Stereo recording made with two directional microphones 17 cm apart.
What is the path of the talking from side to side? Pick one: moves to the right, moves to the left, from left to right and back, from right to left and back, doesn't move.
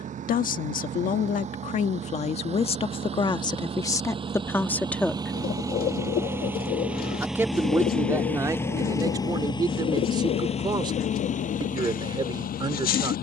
moves to the right.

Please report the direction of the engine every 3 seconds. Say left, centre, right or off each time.
right, right, centre, left, left.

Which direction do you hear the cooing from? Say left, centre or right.
left.